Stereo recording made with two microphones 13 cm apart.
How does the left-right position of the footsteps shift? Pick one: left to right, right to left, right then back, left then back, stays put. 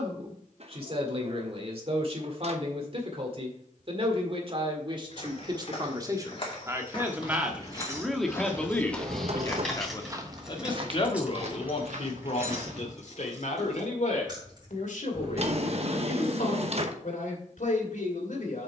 left to right.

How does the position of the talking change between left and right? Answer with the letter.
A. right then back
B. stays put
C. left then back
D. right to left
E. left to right
D.